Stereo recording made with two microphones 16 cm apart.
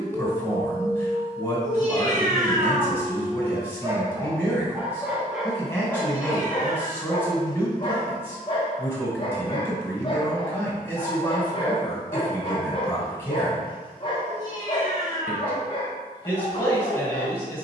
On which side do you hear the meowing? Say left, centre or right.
right.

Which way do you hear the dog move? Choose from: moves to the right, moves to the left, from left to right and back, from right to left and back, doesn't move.
moves to the left.